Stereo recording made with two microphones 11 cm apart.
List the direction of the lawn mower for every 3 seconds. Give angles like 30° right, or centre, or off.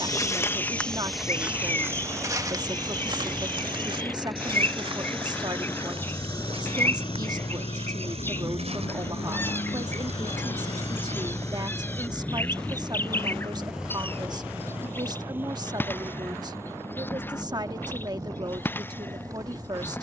20° right, centre, 50° left, 40° left, centre, 20° right, 30° right.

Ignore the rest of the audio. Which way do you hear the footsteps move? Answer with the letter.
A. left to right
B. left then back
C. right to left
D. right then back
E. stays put
A.